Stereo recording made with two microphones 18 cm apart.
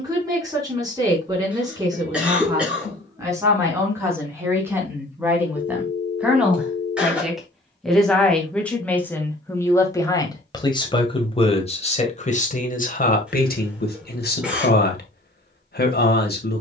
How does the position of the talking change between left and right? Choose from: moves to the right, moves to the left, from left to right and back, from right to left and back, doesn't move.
moves to the left.